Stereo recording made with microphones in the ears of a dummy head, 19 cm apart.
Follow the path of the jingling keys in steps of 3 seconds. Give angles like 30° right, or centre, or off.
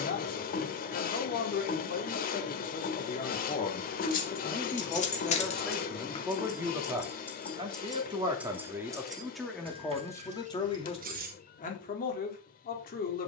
off, 30° left, 10° left, 30° right, off.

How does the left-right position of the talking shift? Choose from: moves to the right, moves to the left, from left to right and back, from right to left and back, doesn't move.
from left to right and back.